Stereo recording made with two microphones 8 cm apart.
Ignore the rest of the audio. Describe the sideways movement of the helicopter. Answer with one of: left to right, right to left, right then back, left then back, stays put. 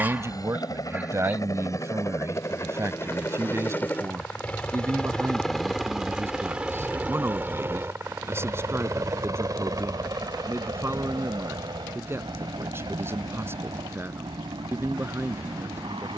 left to right.